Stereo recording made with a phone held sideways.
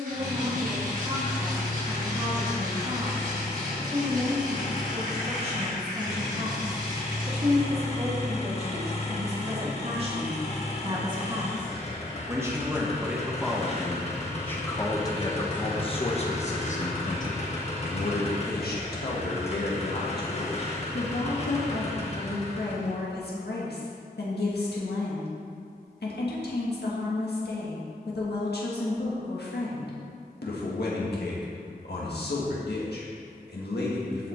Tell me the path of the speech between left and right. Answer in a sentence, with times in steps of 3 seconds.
You can hear the speech on the right from 0 s, in the centre from 12 s and on the left from 15 s.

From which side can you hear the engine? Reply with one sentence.
You can hear the engine on the left.